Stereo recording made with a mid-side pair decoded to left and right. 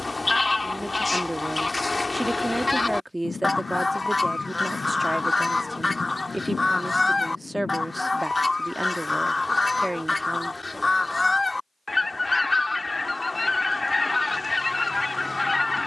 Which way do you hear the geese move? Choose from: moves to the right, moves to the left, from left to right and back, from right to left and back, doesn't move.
doesn't move.